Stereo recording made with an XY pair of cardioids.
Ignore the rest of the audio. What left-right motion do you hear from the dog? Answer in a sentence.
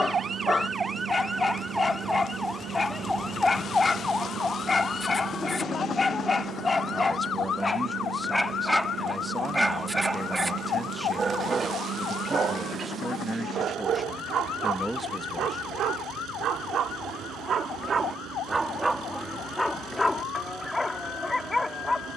In this clip you hear the dog move from left to right and back again.